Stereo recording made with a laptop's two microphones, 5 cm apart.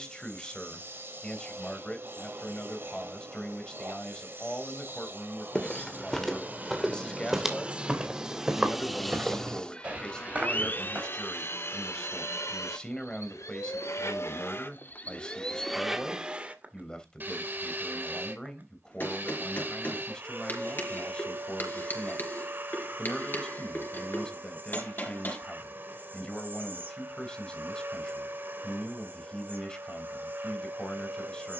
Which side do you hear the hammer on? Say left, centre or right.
left.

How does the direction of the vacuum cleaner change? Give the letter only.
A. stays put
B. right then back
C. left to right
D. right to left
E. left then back
E.